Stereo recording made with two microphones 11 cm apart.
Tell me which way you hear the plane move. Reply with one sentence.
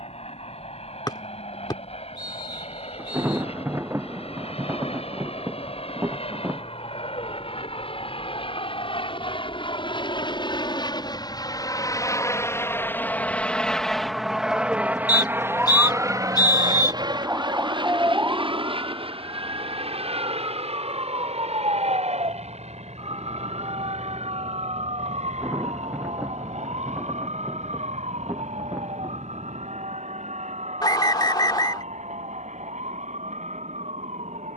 You can hear the plane travel towards the right.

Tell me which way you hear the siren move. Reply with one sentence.
In this clip you hear the siren travel towards the right.